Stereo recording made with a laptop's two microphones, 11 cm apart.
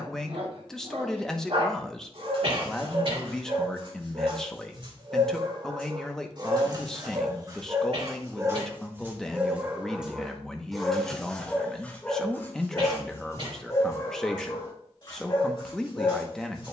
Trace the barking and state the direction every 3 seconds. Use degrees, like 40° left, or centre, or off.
60° right, 50° right, 40° right, centre, 30° left, 50° left.